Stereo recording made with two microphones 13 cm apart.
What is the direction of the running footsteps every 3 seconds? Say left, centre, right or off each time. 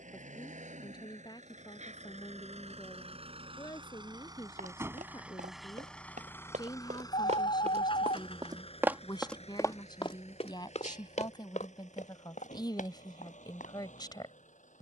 off, right, right, left, left.